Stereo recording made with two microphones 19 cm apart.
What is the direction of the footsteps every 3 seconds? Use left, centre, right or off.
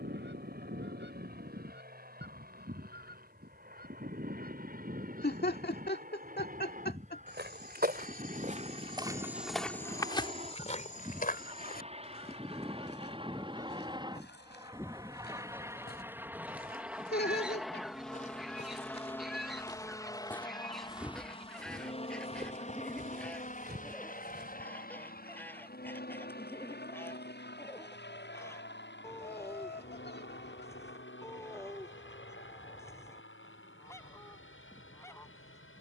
off, off, right, left, left, left, left, right, right, off, off, off.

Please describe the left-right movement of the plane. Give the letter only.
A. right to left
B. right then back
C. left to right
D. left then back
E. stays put
A.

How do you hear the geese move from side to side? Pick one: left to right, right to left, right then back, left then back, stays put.
right to left.